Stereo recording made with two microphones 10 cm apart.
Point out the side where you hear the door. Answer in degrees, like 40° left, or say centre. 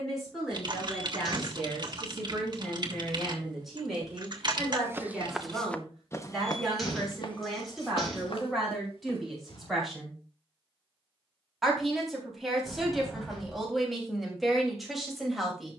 centre.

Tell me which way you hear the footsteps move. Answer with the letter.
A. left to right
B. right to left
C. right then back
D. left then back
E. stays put
B.